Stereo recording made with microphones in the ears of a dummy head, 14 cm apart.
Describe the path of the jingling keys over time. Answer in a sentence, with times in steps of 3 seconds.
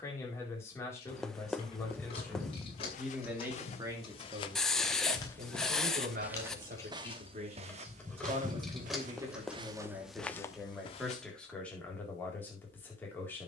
You can hear the jingling keys on the left from 0 s, in the centre from 6 s and not at all from 12 s.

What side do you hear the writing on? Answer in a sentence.
You can hear the writing in the centre.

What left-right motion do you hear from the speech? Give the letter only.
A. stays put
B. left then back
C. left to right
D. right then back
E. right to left
D.